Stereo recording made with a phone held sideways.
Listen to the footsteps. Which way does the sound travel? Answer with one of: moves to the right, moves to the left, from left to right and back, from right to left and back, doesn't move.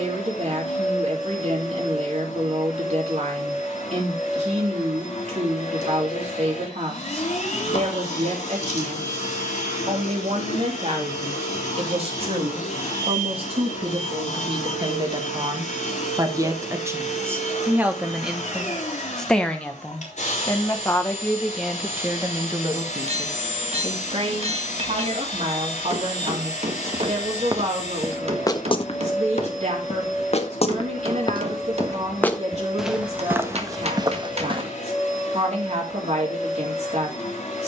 from right to left and back.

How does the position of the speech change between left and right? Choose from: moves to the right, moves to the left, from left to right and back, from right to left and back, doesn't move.
from right to left and back.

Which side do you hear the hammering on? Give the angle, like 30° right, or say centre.
50° right.